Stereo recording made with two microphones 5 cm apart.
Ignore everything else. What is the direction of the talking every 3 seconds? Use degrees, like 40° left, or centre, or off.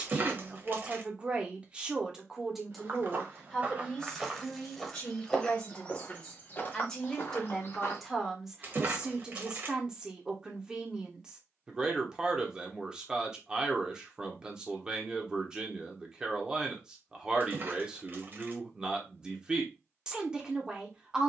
20° right, 20° left, centre, 20° right, 20° right, 20° right, 20° right.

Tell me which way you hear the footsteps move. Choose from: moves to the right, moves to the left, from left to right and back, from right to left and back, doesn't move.
moves to the left.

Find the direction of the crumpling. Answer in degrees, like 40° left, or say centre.
40° right.